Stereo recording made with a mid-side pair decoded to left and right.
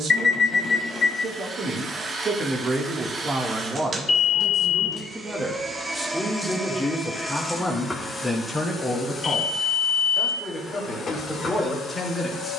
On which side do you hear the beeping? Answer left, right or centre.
left.